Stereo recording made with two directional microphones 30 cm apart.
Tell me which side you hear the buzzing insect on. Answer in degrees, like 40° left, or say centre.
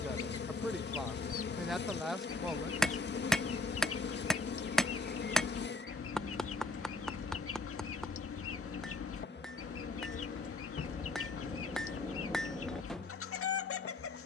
40° left.